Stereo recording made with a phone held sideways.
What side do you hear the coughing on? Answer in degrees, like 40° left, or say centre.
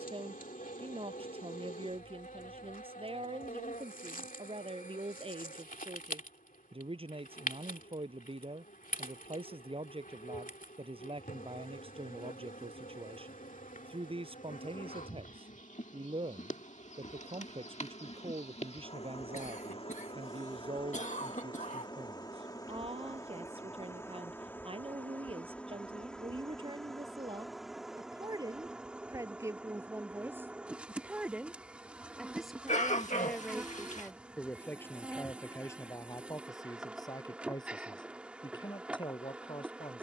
50° left.